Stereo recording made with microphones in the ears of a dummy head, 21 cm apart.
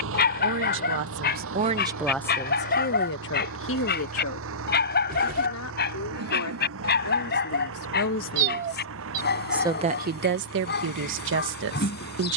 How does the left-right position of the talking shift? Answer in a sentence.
You can hear the talking move from right to left and back again.